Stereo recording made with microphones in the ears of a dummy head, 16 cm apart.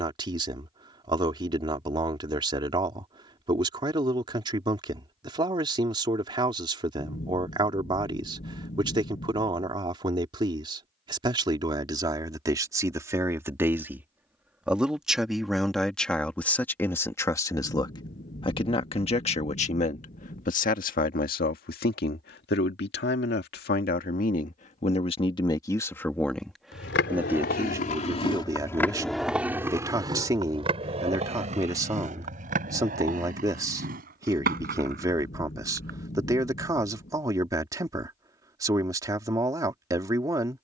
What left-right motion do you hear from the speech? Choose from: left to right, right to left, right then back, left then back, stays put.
left then back.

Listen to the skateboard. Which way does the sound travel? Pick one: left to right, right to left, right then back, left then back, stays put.
left to right.